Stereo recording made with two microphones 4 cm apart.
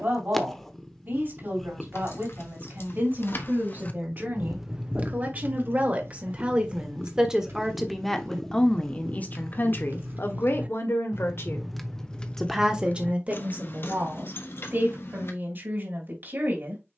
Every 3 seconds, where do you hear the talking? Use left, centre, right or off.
right, right, centre, left, right, right.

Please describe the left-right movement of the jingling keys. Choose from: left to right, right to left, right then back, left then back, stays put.
right then back.